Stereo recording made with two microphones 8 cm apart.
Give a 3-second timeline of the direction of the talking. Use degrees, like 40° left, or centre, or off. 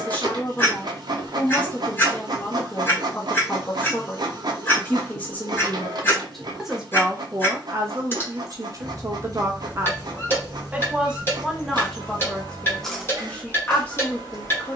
20° left, 20° left, 30° right, 20° right, 10° left.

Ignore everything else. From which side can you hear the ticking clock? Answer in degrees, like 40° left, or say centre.
30° left.